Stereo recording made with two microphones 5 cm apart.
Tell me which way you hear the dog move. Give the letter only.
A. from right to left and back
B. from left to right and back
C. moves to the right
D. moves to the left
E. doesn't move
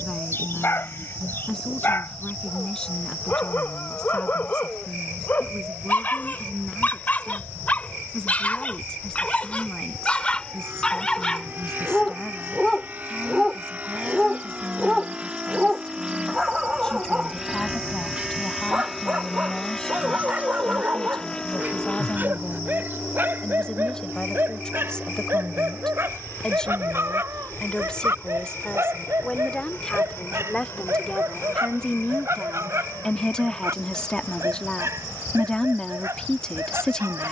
C.